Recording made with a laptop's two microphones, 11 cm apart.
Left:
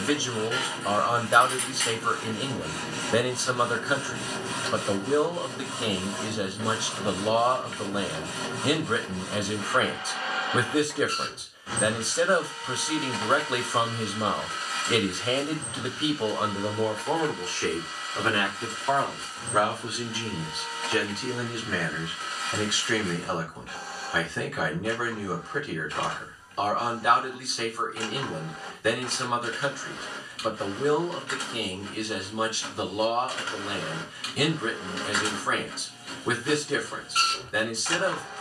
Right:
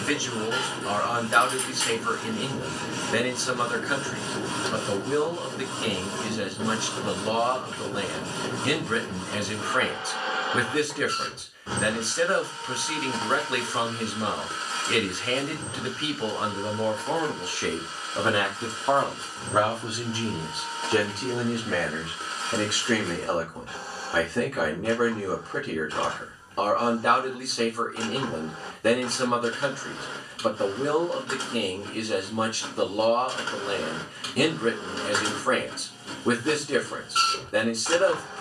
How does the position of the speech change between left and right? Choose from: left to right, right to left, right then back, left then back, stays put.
left to right.